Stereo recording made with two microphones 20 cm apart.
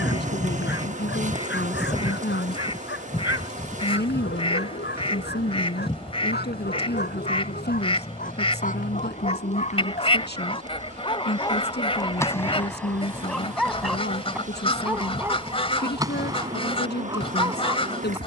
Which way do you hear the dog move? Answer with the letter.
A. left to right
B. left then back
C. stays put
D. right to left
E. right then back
A.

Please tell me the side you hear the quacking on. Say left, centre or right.
left.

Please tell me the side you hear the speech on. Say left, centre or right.
left.